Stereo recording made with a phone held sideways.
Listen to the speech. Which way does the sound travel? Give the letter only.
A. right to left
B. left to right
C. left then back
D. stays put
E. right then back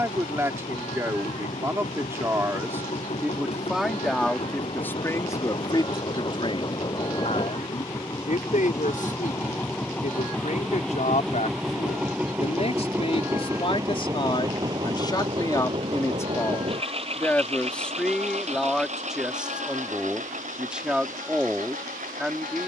C.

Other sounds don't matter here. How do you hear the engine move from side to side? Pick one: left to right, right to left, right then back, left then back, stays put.
left to right.